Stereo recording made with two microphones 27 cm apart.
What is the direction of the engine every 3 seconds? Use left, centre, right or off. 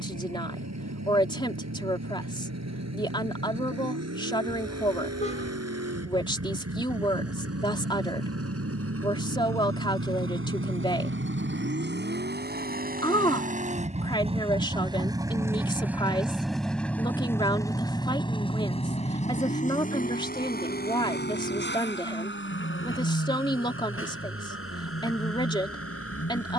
right, right, right, right, right, centre, left, left, left.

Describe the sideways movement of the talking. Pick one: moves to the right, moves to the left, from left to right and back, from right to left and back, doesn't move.
doesn't move.